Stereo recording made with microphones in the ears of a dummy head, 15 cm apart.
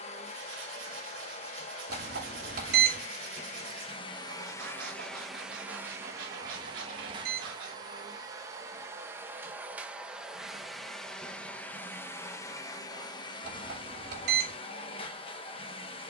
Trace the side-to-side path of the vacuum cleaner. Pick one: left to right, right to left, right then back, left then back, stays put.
right then back.